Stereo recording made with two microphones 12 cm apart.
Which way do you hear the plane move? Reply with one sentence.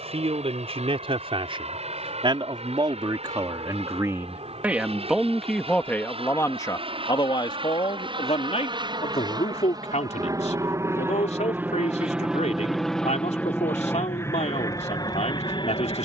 You can hear the plane move to the left.